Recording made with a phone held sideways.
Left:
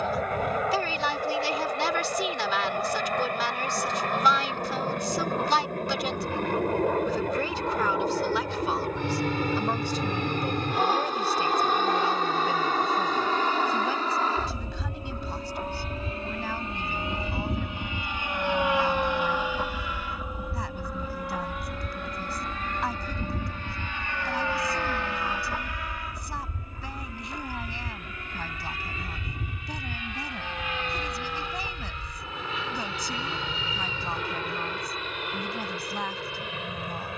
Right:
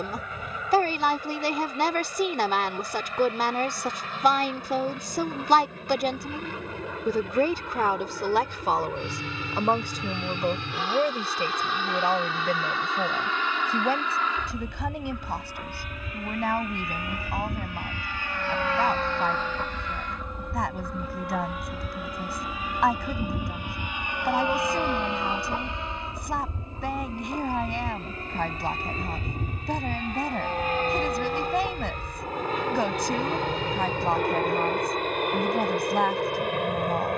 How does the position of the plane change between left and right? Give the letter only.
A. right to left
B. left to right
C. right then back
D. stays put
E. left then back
B.